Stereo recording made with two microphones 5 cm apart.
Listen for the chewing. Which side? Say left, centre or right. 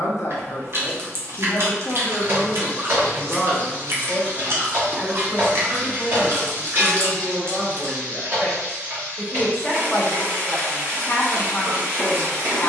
right.